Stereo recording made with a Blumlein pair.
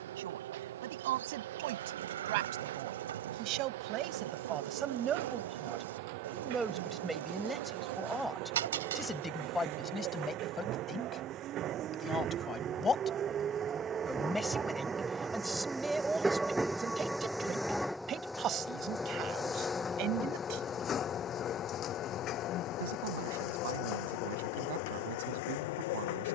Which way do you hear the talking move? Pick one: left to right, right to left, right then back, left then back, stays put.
left then back.